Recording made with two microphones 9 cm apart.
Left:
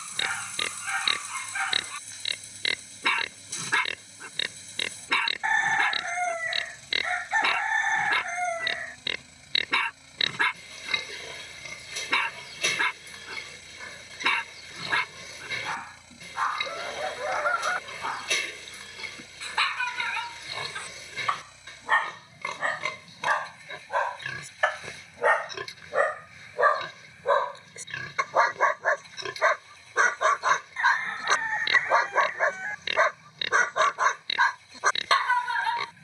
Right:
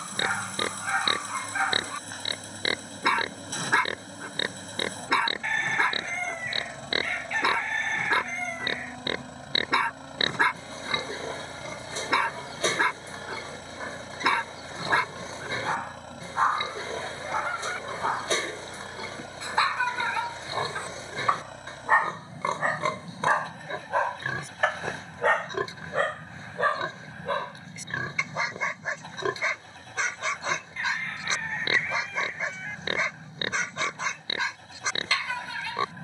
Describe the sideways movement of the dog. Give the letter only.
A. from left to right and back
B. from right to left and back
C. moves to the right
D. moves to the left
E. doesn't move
D.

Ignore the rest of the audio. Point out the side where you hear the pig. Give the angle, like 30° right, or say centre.
30° right.